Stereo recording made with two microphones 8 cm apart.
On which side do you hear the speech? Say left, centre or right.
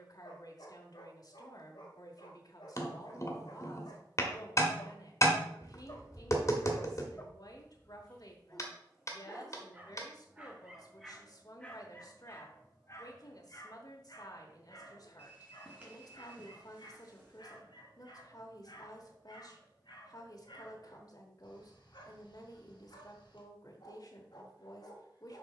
left.